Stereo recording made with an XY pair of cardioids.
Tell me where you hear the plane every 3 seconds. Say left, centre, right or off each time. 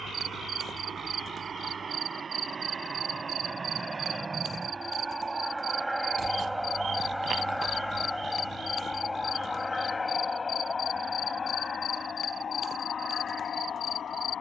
right, right, centre, left, left.